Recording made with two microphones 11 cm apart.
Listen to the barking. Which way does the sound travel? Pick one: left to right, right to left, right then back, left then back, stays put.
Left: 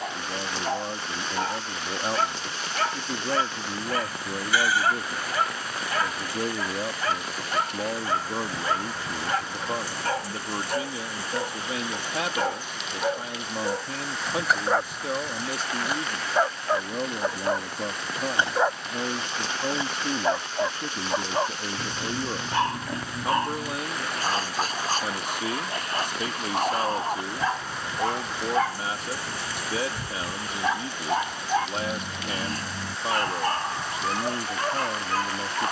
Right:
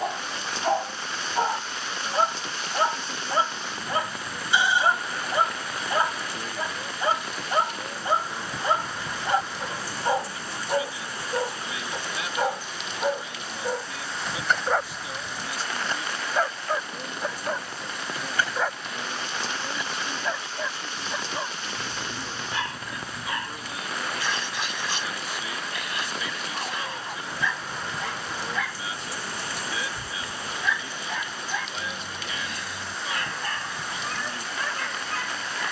right to left.